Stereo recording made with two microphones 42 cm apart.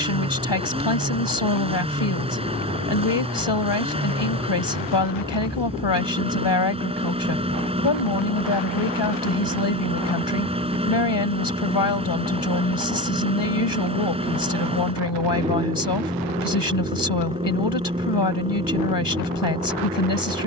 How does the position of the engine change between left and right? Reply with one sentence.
You can hear the engine stay in one place.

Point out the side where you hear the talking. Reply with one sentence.
You can hear the talking on the left.